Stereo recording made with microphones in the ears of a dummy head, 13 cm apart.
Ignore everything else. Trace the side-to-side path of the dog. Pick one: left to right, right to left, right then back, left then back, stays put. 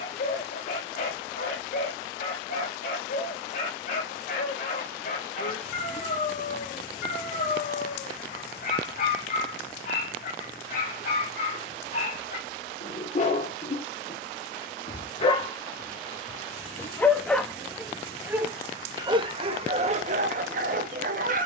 left to right.